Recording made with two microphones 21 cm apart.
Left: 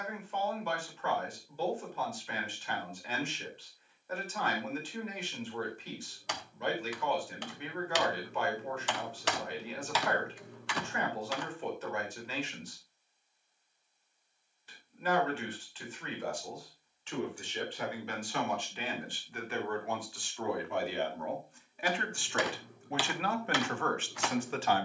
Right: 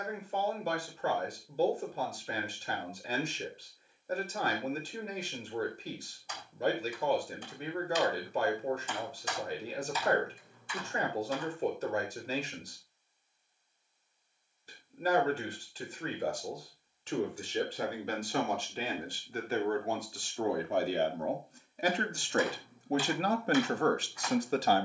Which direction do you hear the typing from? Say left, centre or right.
left.